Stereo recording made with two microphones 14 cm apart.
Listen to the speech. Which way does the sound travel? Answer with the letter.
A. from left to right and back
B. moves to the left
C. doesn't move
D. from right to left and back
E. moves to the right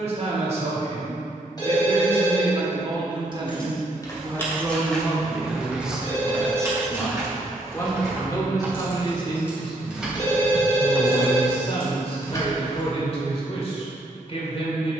B.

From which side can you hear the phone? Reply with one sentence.
In this clip you hear the phone on the left.